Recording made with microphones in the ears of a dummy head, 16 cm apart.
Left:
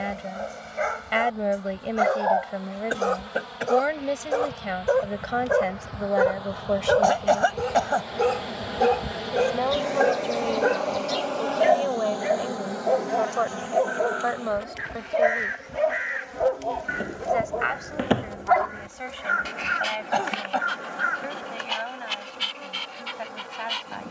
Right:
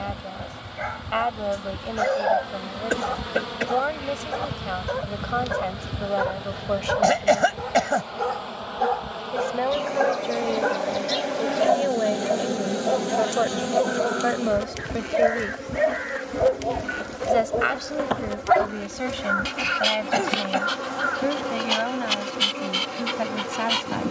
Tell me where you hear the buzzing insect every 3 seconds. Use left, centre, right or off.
right, right, centre, centre, right, right, right, right.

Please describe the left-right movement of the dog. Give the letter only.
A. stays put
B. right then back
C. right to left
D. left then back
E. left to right
E.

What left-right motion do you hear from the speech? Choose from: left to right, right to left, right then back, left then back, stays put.
left to right.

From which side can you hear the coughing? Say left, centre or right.
right.